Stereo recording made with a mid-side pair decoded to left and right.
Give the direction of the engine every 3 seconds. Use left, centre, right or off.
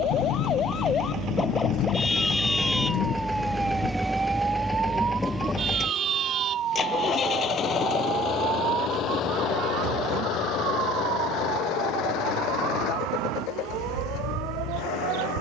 right, centre, left, left, left.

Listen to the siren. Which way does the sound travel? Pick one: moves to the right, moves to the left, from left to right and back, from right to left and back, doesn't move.
moves to the right.